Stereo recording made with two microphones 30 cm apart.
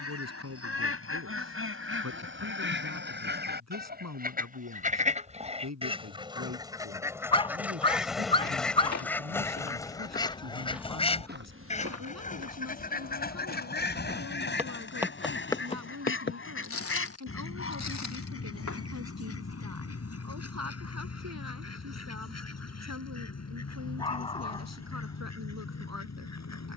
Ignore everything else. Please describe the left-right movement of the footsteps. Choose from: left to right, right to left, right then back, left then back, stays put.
right then back.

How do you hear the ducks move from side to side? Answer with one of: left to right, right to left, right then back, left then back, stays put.
right to left.